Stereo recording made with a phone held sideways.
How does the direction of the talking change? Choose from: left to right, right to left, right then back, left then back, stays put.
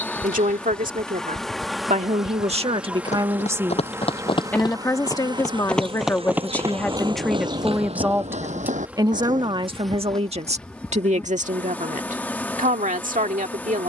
left then back.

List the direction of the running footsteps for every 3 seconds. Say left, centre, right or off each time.
left, left, right, right, off.